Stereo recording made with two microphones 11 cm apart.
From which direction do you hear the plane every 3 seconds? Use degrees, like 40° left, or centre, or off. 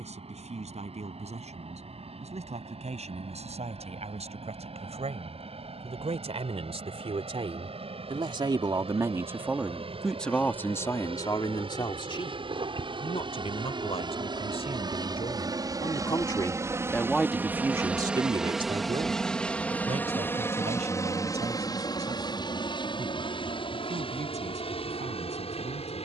80° right, 70° right, 70° right, 60° right, 50° right, 30° right, 10° left, 40° left, 50° left.